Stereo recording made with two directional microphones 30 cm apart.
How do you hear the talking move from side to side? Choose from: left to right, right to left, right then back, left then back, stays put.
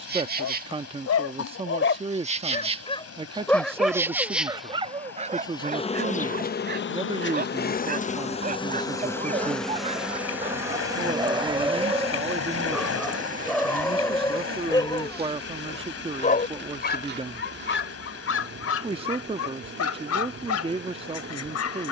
stays put.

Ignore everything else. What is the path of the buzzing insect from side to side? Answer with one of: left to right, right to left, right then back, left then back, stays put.
left then back.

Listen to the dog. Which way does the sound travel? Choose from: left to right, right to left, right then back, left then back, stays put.
right then back.